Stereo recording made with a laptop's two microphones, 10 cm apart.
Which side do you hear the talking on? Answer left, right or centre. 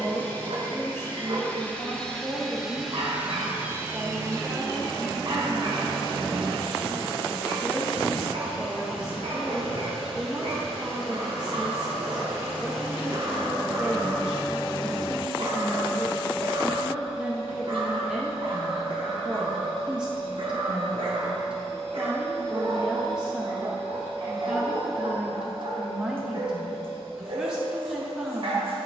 centre.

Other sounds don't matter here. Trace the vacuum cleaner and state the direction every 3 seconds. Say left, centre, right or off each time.
centre, right, right, right, right, right, right, right, right, right.